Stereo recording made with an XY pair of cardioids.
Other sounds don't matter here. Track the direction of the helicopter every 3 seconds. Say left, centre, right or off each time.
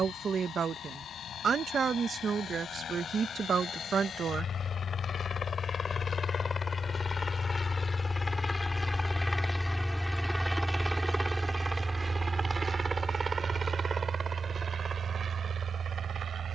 left, left, left, centre, right, right.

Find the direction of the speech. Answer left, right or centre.
right.